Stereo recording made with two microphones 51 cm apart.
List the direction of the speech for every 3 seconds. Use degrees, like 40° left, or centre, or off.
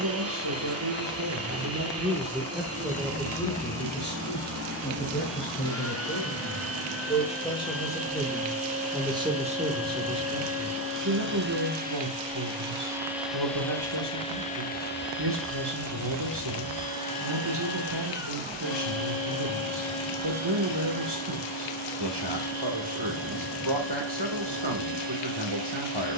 30° right, 20° left, 10° left, 30° right, 50° right, 50° right, 50° right, 50° right, 50° right.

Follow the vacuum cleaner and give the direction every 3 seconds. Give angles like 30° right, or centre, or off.
30° right, 30° right, 30° right, 20° right, centre, 40° left, 60° left, 70° left, 70° left.